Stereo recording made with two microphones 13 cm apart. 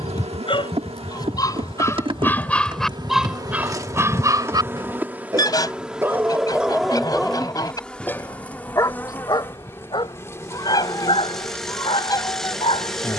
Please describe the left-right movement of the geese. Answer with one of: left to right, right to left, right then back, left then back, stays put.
stays put.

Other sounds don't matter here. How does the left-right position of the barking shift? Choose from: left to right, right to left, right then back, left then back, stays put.
right then back.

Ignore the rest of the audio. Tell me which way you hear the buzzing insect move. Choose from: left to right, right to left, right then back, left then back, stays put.
right to left.